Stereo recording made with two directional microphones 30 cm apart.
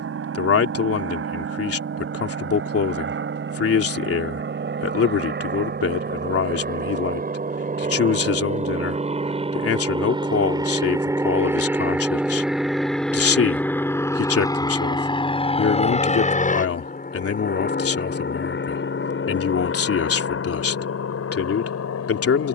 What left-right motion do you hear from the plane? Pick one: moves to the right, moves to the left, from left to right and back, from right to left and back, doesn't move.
moves to the left.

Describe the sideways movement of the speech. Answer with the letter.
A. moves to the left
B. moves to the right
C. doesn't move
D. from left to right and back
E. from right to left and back
C.